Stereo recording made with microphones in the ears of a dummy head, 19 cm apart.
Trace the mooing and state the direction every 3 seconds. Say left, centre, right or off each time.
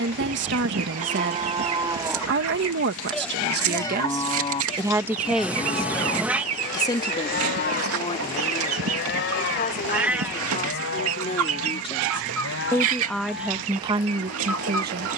right, left, left, left, left.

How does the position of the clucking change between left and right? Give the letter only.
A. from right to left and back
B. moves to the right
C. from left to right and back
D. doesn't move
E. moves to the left
D.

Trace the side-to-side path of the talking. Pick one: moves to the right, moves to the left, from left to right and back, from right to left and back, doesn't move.
from right to left and back.